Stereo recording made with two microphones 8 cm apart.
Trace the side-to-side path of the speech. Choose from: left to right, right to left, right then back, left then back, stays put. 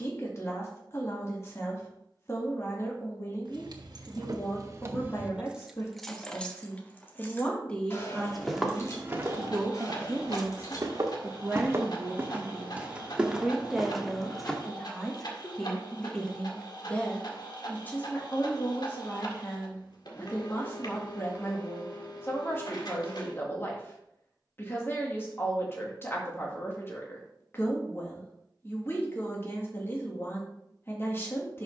right then back.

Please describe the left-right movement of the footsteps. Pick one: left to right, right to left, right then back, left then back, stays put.
right then back.